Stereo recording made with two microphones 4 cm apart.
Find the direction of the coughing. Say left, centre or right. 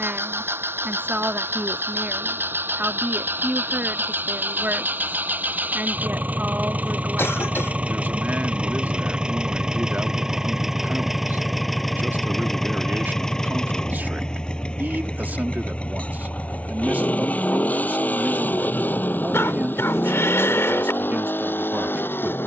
left.